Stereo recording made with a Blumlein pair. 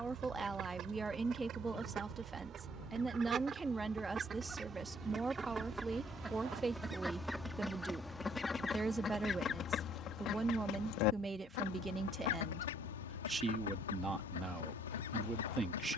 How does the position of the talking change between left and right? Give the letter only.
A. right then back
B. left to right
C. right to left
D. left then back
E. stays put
E.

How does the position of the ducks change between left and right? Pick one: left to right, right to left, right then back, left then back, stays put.
right to left.